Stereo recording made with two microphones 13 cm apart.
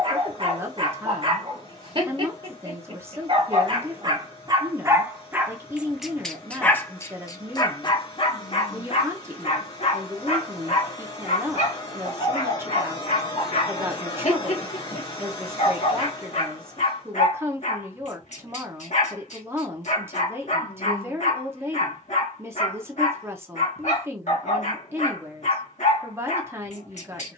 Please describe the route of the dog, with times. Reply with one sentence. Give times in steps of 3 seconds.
You can hear the dog on the right from 0 s and on the left from 6 s.